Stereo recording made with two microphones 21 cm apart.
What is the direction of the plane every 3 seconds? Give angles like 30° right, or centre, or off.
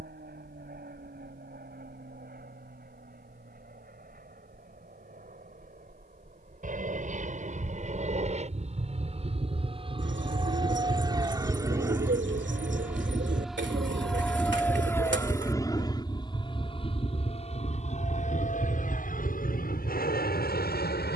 60° right, 50° right, 40° right, 20° right, centre, 20° left, 40° left.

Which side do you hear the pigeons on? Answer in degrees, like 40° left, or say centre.
70° right.